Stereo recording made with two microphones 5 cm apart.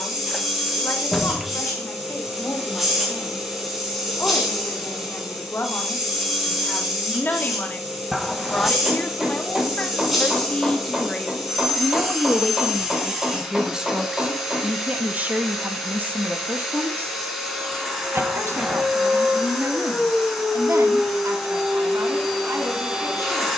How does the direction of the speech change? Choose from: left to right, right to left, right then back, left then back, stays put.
left to right.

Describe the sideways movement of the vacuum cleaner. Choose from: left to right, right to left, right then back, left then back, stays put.
stays put.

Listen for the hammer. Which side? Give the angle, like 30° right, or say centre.
10° right.